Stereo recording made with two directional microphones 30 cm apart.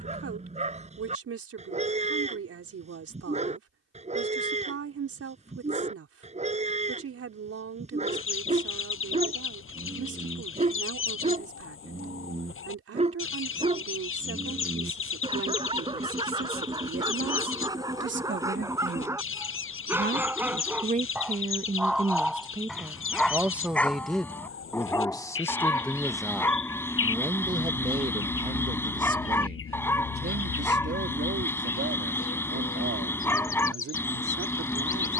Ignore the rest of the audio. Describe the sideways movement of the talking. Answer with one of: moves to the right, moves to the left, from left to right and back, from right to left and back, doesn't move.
from right to left and back.